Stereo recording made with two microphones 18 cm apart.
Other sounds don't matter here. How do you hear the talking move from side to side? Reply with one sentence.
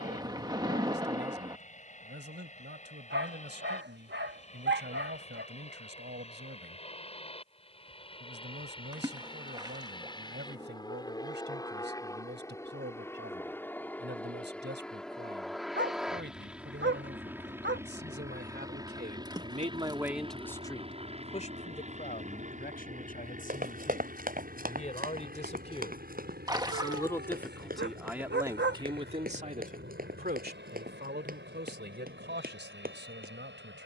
In this clip you hear the talking go left and come back.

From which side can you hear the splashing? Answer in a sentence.
You can hear the splashing on the right.